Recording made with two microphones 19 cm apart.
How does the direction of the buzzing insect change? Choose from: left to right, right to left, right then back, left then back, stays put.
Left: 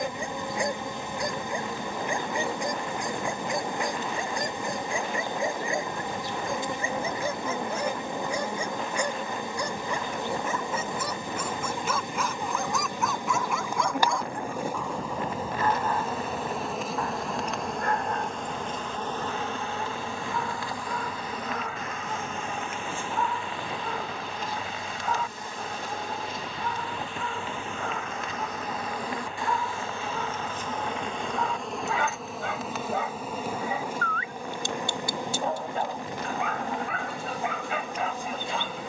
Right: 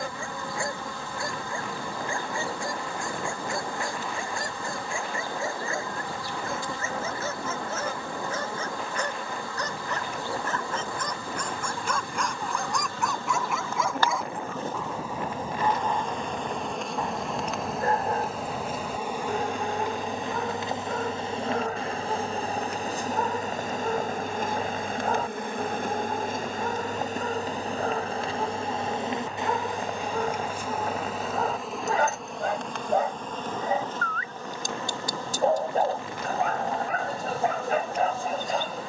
right then back.